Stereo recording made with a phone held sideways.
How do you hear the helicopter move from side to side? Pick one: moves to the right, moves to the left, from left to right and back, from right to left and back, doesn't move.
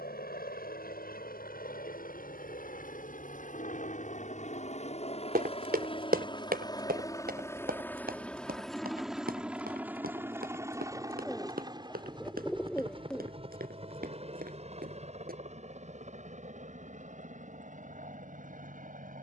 moves to the right.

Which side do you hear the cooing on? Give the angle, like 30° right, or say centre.
10° left.